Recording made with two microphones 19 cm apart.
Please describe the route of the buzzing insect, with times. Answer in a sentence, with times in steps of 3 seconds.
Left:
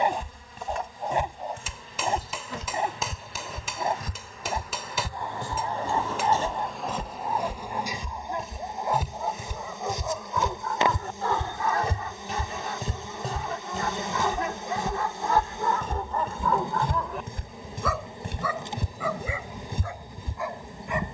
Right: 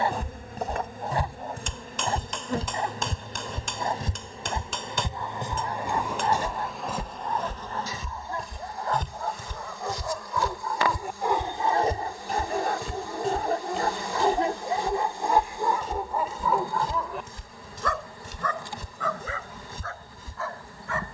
You can hear the buzzing insect on the right from 0 s, in the centre from 6 s and on the left from 9 s.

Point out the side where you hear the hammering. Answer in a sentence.
You can hear the hammering in the centre.